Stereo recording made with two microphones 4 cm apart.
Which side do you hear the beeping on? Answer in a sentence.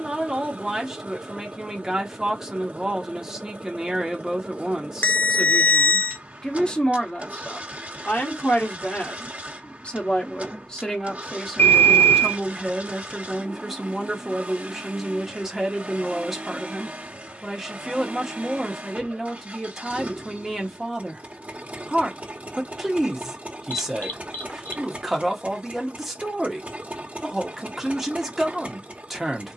You can hear the beeping on the left.